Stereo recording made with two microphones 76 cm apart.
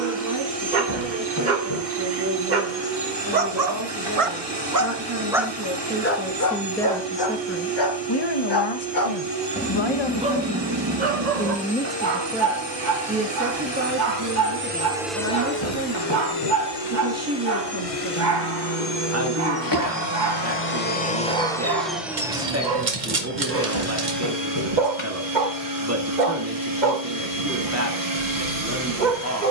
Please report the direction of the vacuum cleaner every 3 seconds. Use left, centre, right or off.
right, right, right, right, right, left, left, centre, right, right.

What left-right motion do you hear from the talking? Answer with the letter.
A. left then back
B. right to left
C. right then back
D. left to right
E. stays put
A.